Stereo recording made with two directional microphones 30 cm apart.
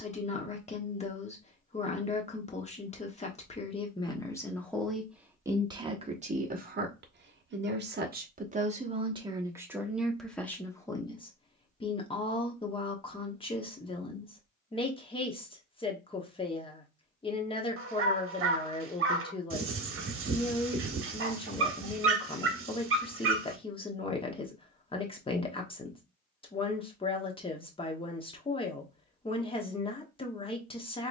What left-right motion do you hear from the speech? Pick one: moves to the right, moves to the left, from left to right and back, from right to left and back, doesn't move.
from left to right and back.